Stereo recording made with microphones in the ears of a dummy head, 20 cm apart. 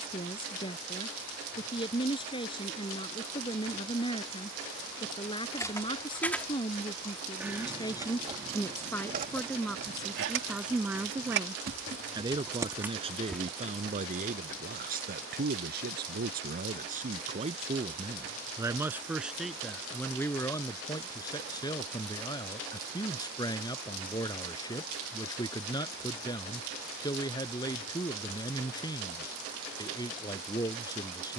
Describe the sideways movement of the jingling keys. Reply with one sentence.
In this clip you hear the jingling keys go right and come back.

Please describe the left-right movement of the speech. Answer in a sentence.
You can hear the speech move from left to right and back again.